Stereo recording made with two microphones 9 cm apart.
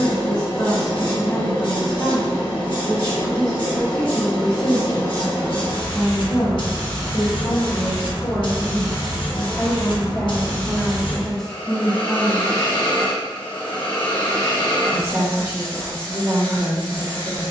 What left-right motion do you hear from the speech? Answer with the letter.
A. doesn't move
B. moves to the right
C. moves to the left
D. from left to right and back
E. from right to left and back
B.